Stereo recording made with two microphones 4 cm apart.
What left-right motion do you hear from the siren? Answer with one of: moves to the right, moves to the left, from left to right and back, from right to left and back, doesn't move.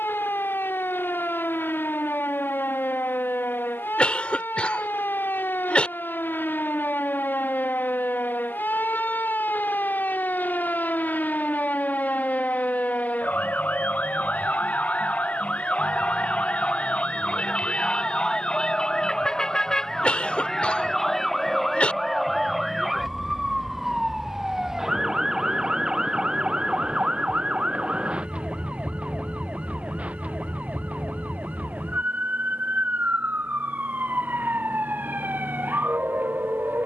moves to the right.